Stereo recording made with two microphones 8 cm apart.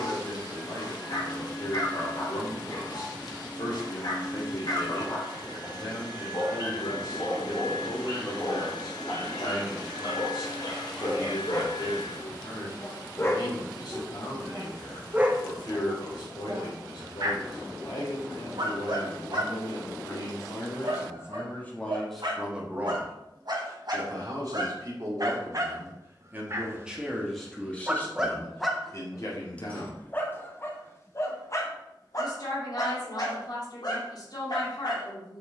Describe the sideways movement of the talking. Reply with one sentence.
In this clip you hear the talking move from left to right and back again.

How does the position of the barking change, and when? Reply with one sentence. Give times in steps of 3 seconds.
You can hear the barking on the left from 0 s, on the right from 15 s, in the centre from 27 s and on the left from 30 s.